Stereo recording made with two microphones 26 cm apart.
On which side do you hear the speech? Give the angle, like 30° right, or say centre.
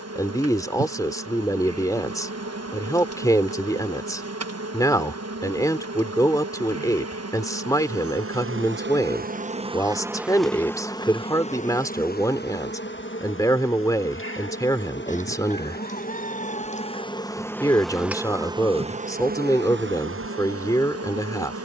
10° left.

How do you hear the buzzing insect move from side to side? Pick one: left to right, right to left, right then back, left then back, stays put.
left then back.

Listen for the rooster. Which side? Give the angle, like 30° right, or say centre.
30° left.